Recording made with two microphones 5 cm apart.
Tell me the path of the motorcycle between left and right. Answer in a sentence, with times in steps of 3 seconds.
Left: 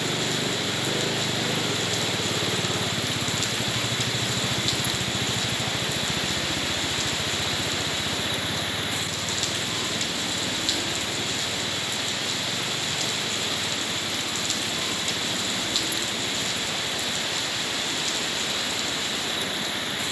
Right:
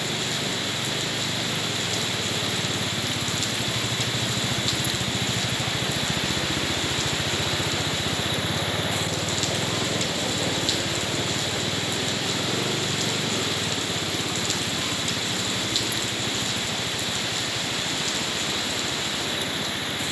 You can hear the motorcycle on the left from 0 s, in the centre from 3 s and on the right from 6 s.